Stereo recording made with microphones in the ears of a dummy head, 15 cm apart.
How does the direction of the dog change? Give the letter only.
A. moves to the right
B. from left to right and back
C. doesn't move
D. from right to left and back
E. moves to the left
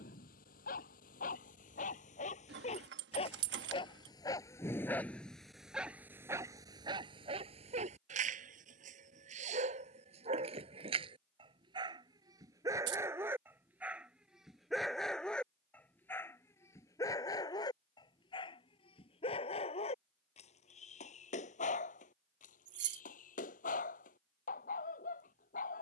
B.